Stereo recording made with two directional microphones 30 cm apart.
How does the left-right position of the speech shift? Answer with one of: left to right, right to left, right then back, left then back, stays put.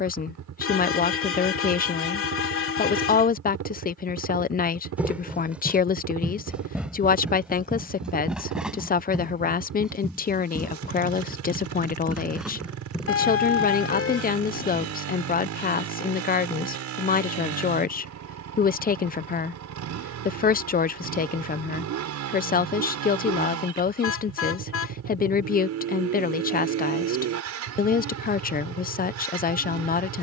stays put.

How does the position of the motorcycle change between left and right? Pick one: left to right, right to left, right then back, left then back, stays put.
stays put.